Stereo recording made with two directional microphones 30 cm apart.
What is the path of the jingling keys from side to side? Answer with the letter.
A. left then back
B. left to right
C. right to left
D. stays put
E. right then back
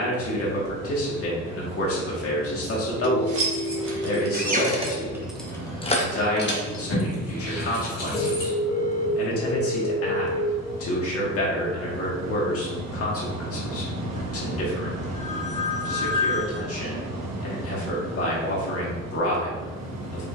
C.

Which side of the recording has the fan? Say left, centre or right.
right.